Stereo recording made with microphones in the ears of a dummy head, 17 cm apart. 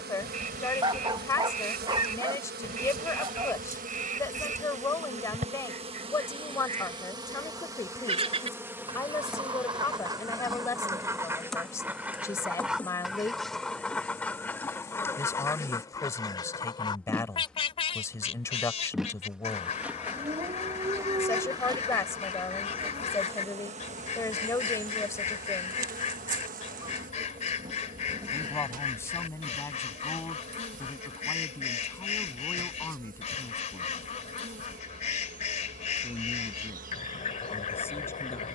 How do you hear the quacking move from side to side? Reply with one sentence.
You can hear the quacking travel towards the left.